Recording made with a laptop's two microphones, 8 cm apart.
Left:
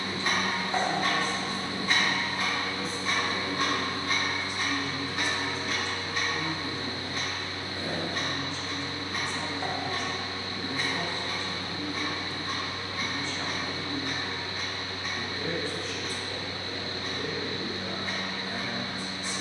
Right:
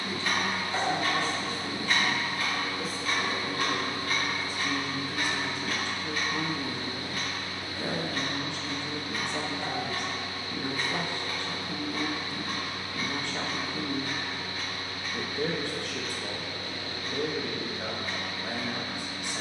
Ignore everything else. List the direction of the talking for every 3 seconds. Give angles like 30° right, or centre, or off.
10° left, 40° right, 60° right, 60° right, 60° right, 60° right, 60° right.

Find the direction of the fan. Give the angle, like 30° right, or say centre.
30° left.